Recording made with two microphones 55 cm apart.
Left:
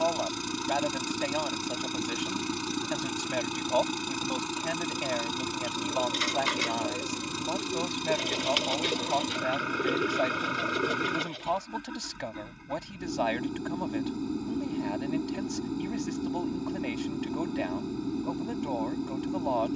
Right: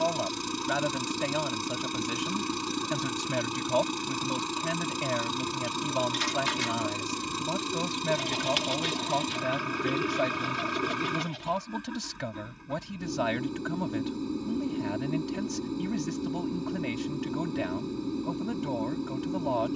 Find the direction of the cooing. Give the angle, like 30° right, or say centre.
20° right.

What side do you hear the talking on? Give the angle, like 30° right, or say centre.
40° right.